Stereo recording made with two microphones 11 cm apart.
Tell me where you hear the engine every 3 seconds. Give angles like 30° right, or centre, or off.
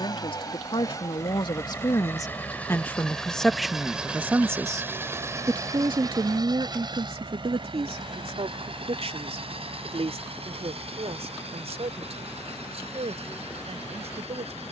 30° left, 10° right, 50° right, 70° right, 80° right.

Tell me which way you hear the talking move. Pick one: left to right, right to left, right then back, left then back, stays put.
left to right.